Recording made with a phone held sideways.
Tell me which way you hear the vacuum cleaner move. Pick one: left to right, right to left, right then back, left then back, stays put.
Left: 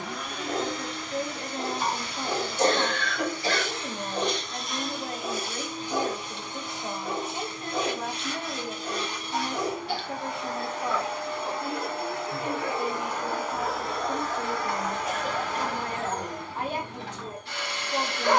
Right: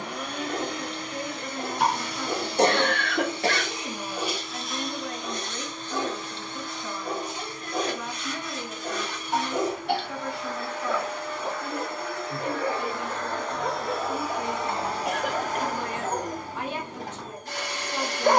left then back.